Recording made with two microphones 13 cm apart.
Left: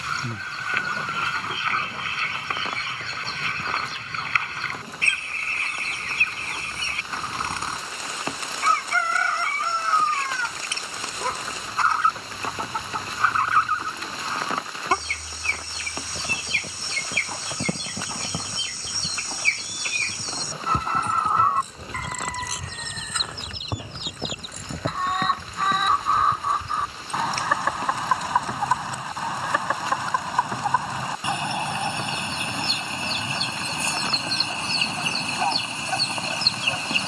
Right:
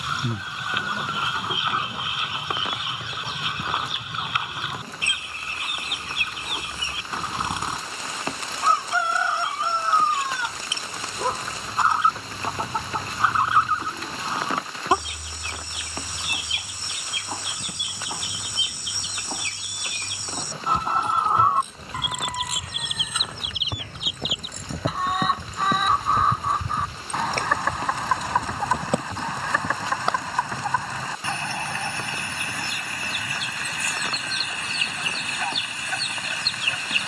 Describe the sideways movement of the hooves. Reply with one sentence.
You can hear the hooves go from the left side to the right.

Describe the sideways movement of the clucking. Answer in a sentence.
You can hear the clucking move from right to left.